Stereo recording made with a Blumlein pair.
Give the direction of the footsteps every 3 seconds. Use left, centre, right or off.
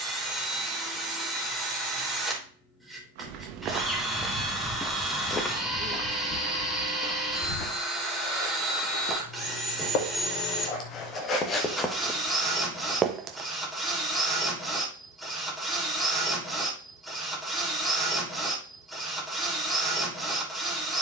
off, centre, left, left, centre, off, off.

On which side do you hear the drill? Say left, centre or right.
centre.